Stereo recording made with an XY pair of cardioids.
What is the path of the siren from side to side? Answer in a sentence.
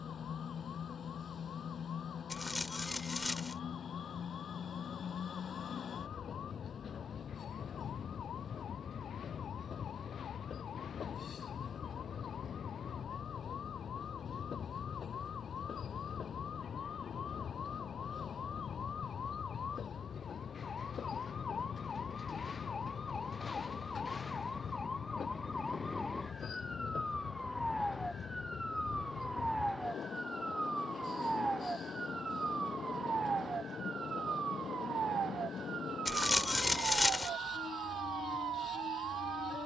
In this clip you hear the siren go from the left side to the right.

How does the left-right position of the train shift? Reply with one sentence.
In this clip you hear the train stay put.